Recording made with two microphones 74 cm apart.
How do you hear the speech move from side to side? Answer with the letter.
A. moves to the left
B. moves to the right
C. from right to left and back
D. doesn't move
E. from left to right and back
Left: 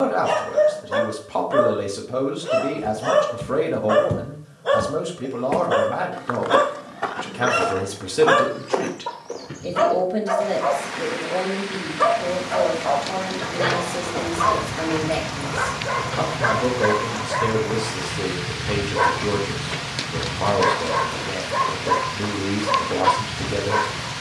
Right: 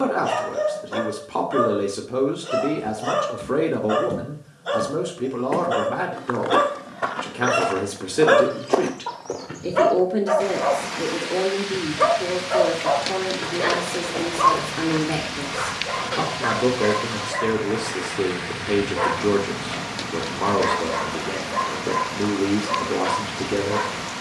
D.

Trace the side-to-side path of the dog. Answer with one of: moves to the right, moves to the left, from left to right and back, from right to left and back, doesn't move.
from left to right and back.